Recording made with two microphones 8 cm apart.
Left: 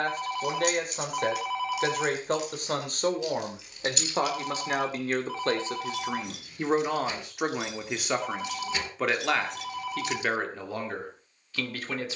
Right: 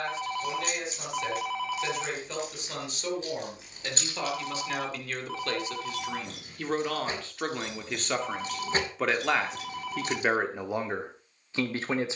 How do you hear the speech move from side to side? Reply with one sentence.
You can hear the speech move from left to right.